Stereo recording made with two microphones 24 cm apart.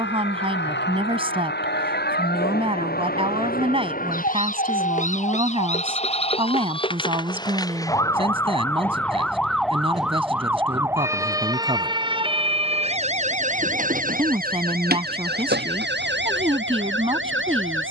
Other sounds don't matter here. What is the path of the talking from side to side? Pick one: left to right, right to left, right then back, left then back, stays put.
stays put.